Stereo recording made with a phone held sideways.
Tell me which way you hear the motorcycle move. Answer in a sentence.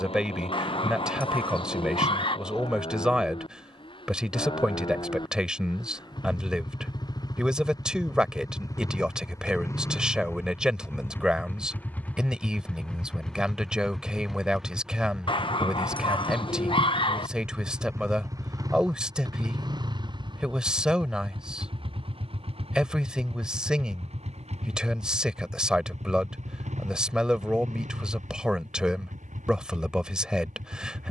In this clip you hear the motorcycle go from the left side to the right.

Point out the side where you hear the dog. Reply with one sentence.
In this clip you hear the dog on the left.